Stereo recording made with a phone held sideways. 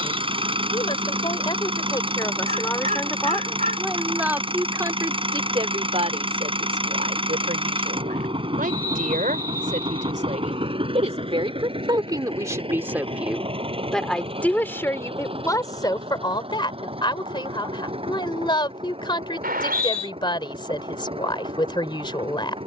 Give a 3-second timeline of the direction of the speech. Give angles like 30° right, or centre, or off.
30° left, 10° right, 60° right, 50° right, 10° right, 30° left, 30° left, 30° left.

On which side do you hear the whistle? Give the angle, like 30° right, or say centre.
70° right.